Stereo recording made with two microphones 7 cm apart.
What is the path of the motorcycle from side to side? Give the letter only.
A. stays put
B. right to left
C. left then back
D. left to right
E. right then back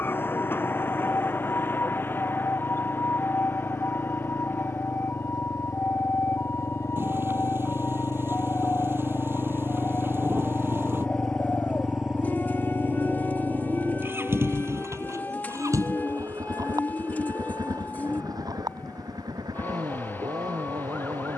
D.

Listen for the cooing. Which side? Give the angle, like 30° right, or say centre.
20° left.